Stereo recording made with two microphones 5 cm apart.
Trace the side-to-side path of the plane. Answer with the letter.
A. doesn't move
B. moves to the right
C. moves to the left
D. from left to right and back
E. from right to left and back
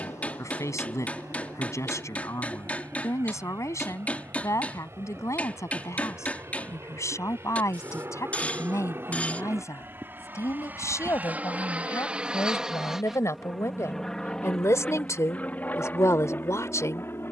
C.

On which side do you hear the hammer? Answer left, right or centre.
left.